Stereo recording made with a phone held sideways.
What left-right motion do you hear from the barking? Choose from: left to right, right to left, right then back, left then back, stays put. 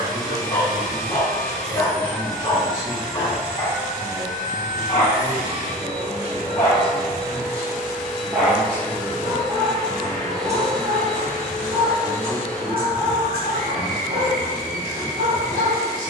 left to right.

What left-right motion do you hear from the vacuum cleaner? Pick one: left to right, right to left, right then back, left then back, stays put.
right then back.